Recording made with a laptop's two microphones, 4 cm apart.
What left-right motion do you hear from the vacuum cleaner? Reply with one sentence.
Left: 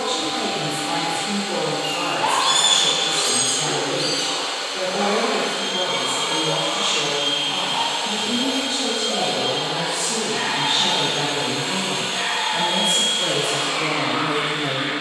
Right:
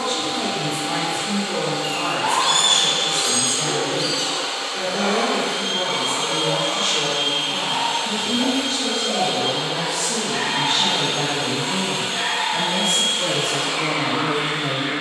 In this clip you hear the vacuum cleaner stay put.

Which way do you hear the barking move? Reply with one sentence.
In this clip you hear the barking go right and come back.